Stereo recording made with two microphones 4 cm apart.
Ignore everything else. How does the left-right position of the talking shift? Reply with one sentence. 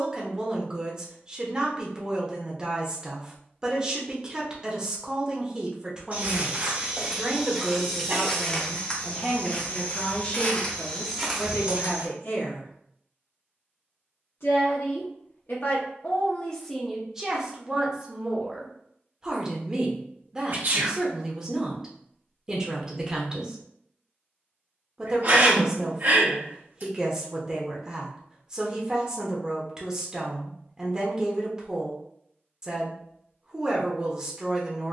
In this clip you hear the talking move from right to left and back again.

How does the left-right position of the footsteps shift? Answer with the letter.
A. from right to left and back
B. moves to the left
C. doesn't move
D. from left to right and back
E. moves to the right
A.